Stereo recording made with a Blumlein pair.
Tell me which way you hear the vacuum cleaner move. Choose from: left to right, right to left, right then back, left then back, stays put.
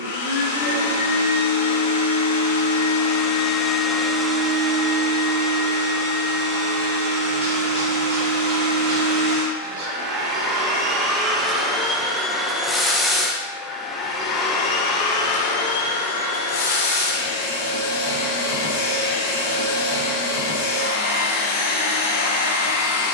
right then back.